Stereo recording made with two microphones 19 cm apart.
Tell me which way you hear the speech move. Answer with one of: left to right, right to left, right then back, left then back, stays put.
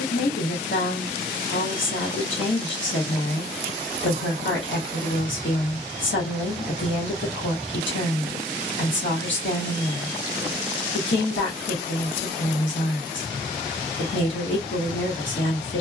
stays put.